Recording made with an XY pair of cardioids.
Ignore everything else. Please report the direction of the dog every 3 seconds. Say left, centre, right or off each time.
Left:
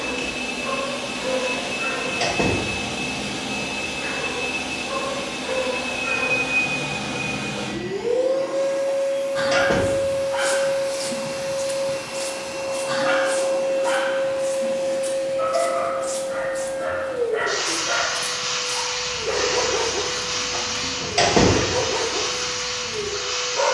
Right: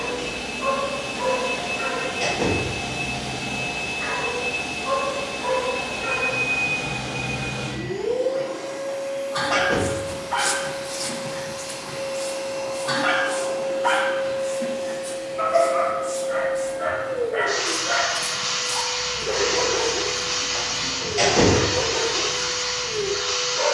right, right, right, right, right, right, left, left.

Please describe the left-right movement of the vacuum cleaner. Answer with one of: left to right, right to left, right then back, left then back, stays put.
left to right.